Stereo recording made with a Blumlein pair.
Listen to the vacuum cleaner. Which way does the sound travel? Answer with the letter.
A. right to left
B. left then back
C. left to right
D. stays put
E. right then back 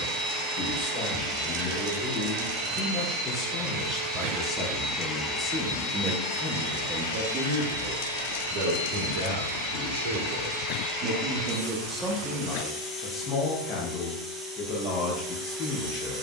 B.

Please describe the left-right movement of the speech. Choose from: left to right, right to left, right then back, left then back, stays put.
right then back.